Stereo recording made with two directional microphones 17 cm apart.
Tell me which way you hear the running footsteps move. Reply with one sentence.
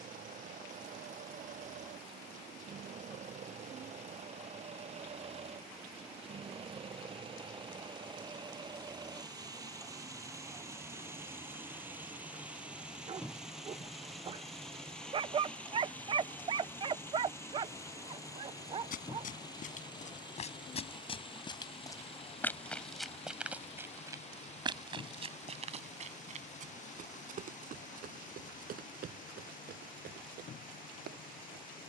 In this clip you hear the running footsteps move to the right.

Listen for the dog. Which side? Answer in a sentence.
In this clip you hear the dog on the right.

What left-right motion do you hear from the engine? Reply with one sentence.
You can hear the engine travel towards the left.